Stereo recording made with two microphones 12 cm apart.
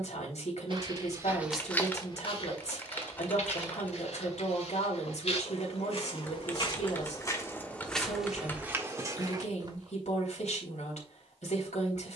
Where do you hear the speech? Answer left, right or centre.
left.